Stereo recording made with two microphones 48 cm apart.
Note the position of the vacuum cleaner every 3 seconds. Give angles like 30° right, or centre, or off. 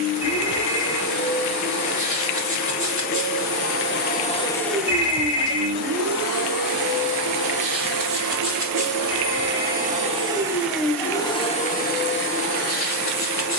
40° left, 10° left, 40° right, 10° right, 30° left.